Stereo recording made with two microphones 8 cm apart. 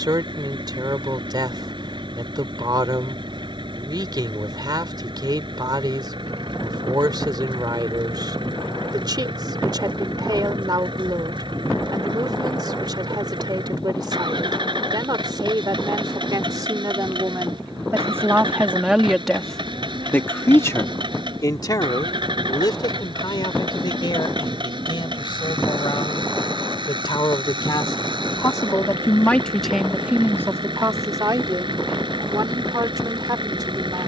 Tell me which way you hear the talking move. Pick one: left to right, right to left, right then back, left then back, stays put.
left then back.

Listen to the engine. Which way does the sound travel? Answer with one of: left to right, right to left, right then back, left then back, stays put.
stays put.